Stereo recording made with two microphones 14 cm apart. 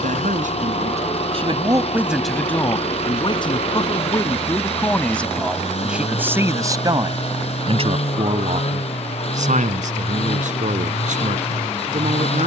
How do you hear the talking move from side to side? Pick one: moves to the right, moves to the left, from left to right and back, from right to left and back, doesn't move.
from right to left and back.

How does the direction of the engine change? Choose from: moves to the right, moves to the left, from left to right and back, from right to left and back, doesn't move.
doesn't move.